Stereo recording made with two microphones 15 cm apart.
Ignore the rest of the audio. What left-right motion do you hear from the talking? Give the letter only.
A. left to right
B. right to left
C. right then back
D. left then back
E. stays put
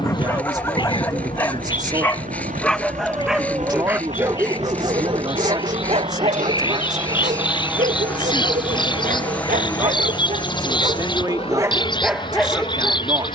E.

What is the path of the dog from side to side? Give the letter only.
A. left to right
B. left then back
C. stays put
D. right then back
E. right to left
D.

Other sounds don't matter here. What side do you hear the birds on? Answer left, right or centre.
left.